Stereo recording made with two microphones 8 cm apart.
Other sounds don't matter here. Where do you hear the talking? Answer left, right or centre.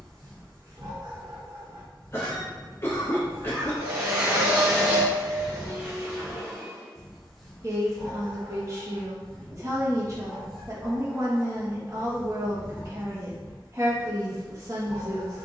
right.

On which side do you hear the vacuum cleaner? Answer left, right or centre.
right.